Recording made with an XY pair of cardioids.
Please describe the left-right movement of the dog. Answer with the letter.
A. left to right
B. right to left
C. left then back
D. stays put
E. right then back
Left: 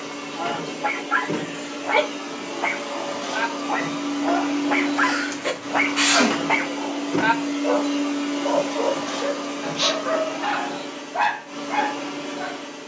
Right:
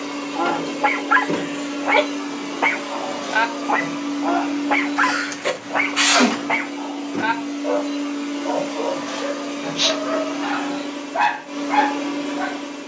C.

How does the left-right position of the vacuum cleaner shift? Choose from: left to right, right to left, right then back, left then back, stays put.
left then back.